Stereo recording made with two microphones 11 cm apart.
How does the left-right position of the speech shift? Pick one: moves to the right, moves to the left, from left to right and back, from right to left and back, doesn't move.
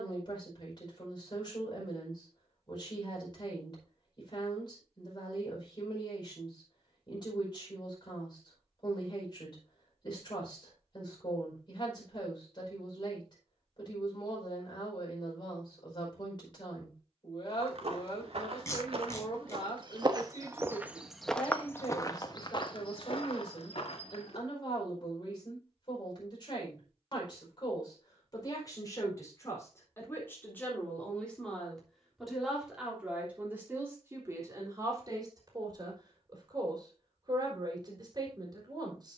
moves to the right.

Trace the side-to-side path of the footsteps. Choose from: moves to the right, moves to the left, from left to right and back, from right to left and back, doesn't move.
moves to the left.